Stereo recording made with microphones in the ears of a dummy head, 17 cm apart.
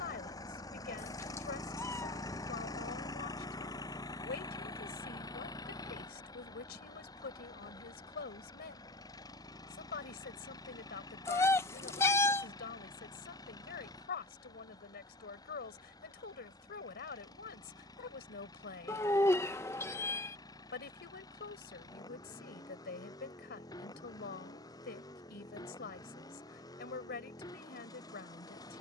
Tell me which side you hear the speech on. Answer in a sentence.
You can hear the speech on the left.